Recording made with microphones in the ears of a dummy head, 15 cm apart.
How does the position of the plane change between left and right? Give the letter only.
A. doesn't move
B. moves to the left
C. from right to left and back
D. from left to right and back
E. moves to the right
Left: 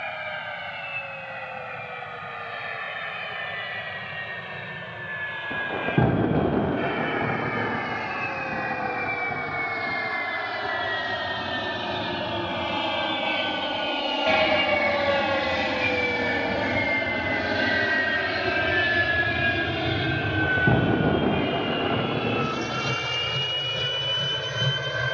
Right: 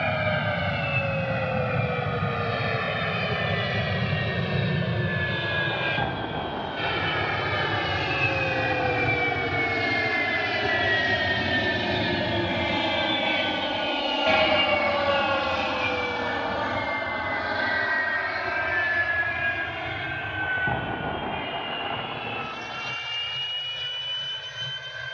B.